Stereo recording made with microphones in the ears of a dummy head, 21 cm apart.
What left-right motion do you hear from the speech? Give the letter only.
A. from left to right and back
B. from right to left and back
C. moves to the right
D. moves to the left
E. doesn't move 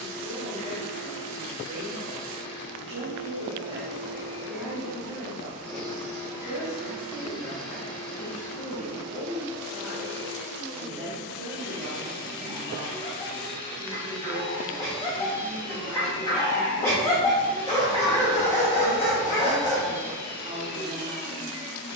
B.